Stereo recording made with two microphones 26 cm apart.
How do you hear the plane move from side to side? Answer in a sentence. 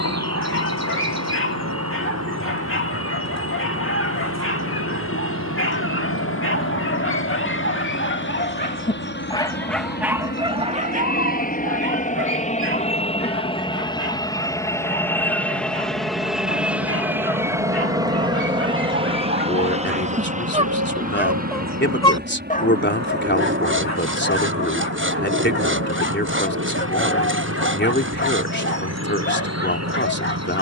You can hear the plane move from left to right.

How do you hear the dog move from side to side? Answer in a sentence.
In this clip you hear the dog move from left to right and back again.